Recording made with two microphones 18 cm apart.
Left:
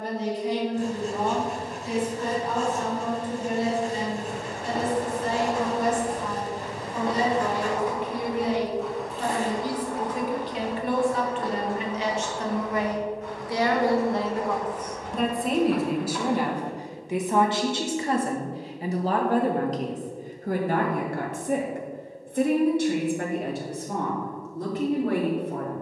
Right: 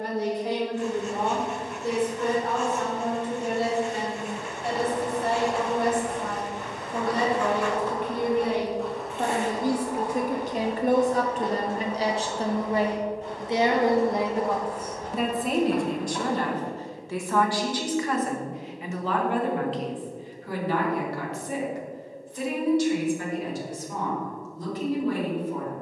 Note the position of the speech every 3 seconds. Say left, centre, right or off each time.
right, right, right, right, right, centre, left, left, left.